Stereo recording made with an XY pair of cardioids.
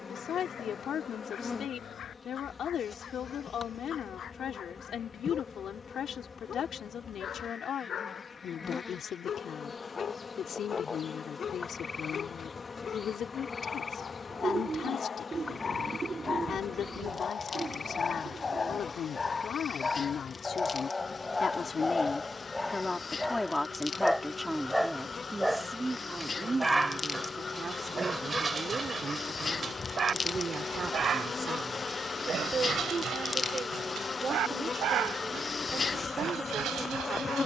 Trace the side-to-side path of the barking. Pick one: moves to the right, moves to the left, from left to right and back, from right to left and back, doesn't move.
moves to the right.